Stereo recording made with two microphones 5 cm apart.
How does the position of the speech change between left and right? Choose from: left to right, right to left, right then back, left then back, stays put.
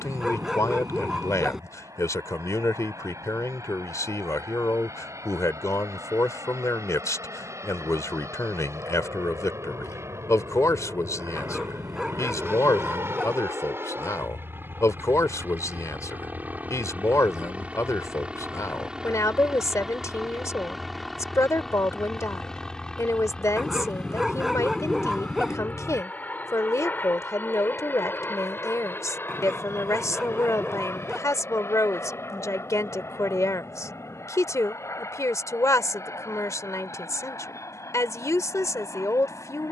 stays put.